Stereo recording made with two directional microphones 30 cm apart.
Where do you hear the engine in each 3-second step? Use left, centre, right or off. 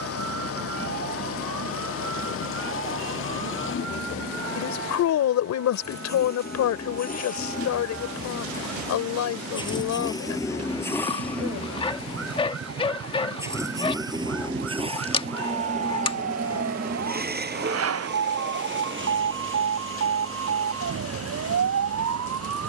left, left, left, centre, centre, right, right, right.